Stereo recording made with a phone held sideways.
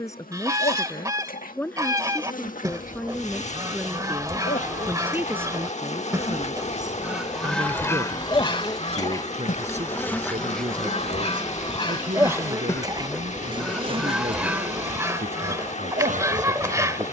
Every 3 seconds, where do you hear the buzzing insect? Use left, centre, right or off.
left, left, left, centre, right, right.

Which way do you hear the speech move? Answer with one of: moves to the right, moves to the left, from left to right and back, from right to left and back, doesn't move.
moves to the right.